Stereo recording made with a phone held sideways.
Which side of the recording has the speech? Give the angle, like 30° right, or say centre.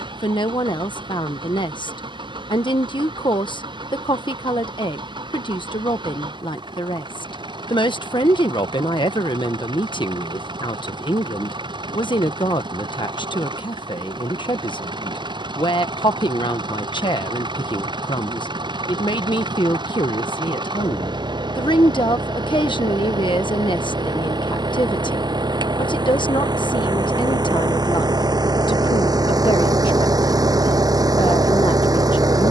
40° left.